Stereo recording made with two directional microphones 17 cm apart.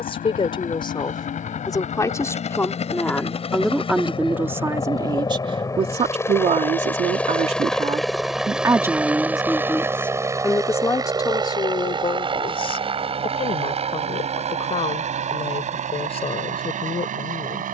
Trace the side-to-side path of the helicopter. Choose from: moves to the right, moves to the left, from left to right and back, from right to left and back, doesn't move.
moves to the right.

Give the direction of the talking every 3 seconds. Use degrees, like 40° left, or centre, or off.
20° left, 10° right, 40° right, 10° left, 30° left, 40° left.